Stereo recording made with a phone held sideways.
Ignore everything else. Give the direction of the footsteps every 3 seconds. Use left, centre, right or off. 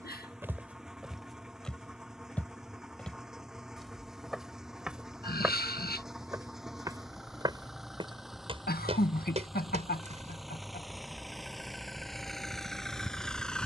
centre, centre, right, right, off.